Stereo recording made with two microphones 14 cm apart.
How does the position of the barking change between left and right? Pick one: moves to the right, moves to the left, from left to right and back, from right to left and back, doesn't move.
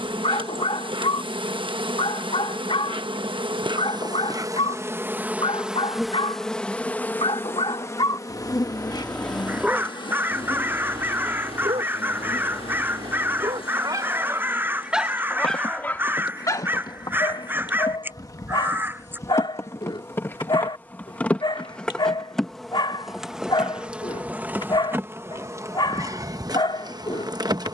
from left to right and back.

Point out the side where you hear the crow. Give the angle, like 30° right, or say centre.
10° right.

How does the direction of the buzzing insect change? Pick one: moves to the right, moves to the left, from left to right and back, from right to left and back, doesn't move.
from right to left and back.